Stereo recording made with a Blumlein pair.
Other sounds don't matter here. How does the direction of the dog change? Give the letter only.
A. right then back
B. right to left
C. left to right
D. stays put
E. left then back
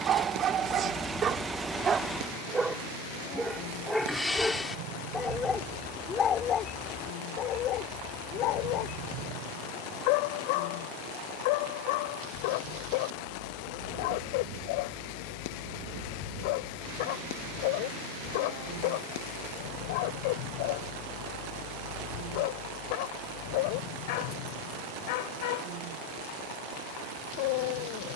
B.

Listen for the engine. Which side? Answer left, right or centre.
centre.